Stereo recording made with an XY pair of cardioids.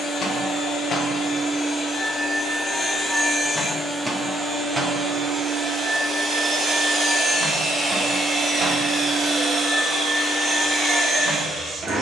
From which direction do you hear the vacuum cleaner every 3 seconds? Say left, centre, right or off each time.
left, centre, right, right.